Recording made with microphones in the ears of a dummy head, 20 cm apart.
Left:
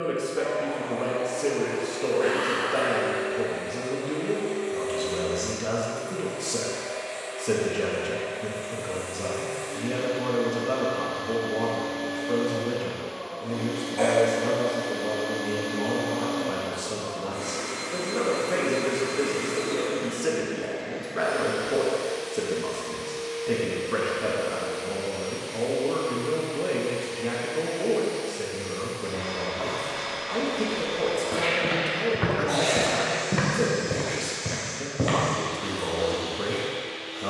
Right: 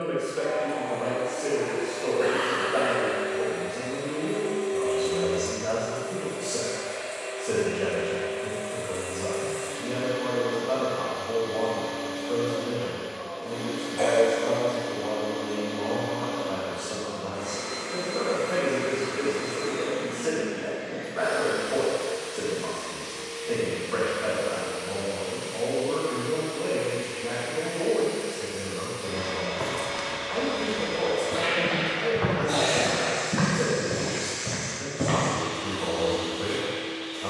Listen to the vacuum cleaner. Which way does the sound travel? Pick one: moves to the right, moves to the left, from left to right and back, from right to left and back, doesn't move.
from right to left and back.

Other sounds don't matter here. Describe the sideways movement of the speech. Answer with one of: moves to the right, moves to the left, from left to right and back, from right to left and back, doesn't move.
doesn't move.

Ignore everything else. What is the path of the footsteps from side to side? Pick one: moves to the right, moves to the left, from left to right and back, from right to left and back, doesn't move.
moves to the left.